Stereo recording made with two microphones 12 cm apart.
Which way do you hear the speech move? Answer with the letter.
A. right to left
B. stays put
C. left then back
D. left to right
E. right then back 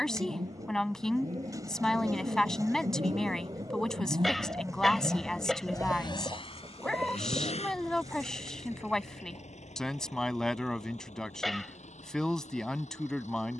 B.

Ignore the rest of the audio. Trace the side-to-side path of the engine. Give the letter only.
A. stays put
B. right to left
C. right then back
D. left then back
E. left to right
B.